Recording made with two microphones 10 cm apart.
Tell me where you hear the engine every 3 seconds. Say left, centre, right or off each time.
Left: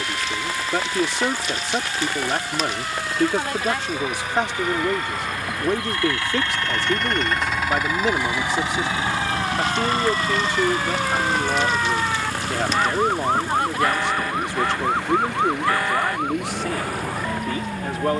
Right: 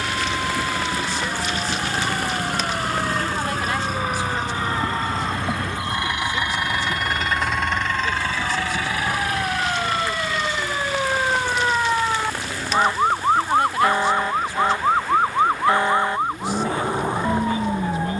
right, right, centre, left, left, left.